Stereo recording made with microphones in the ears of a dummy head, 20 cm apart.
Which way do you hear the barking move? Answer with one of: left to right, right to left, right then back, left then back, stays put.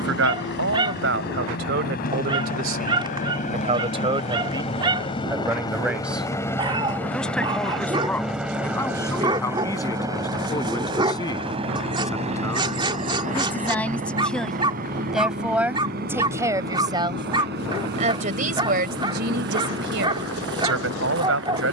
stays put.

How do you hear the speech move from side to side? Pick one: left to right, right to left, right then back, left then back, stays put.
left then back.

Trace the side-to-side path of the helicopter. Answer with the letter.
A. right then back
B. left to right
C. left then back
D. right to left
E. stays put
B.